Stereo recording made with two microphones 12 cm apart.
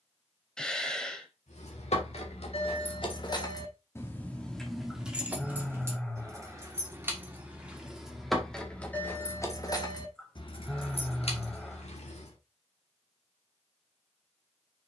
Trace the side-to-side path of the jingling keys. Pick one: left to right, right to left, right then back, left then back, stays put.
right then back.